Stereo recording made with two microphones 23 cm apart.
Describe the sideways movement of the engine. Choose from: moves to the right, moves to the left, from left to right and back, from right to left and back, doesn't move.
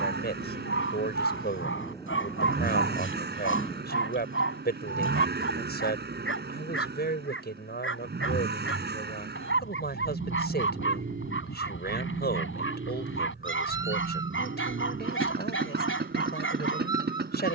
doesn't move.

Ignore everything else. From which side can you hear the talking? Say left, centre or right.
left.